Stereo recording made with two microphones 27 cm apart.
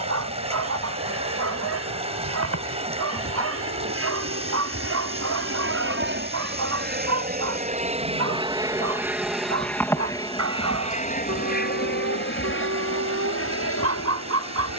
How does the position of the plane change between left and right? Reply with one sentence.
In this clip you hear the plane move to the left.